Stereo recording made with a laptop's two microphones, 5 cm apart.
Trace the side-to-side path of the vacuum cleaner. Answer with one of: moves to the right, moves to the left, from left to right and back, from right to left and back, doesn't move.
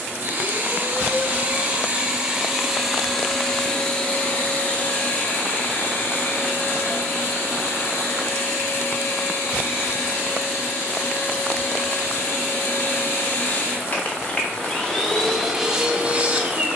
from right to left and back.